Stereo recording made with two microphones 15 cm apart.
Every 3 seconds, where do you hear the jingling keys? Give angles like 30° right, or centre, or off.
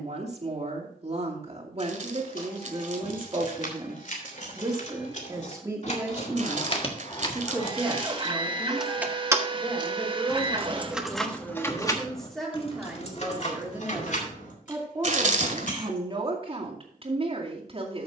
60° left, 60° left, 30° left, 10° right, 50° left, 60° left.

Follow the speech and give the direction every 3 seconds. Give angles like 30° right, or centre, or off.
40° right, 30° right, 10° right, centre, 10° right, 40° right.